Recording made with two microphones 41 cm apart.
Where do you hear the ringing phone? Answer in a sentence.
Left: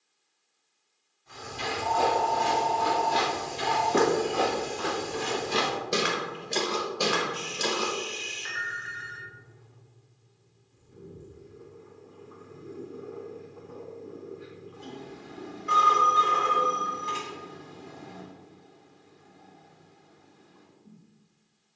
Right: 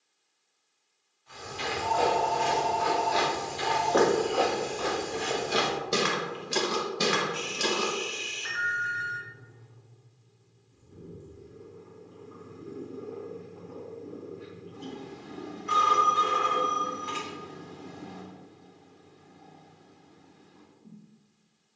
In this clip you hear the ringing phone on the right.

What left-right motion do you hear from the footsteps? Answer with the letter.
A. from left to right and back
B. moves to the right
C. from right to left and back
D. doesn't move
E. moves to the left
B.